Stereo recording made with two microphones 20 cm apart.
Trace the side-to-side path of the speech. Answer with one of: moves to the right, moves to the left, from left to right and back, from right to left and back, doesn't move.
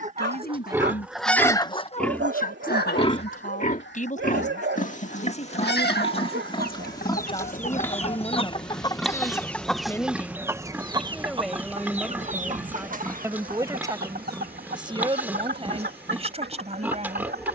moves to the right.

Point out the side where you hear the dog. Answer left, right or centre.
right.